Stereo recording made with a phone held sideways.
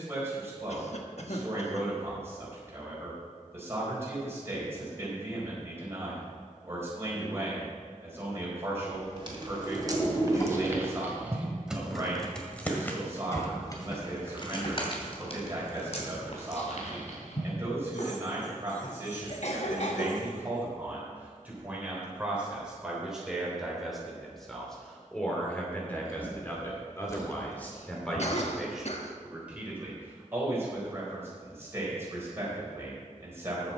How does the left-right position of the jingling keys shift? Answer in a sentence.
You can hear the jingling keys travel towards the left.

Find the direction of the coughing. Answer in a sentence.
In this clip you hear the coughing on the left.